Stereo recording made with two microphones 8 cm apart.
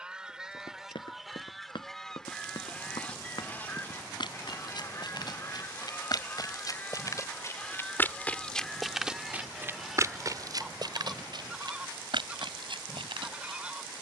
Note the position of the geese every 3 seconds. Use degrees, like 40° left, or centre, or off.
centre, 30° left, 20° left, centre, 10° right.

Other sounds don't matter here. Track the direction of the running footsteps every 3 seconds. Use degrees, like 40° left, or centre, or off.
70° left, 60° left, 30° left, 40° right, 70° right.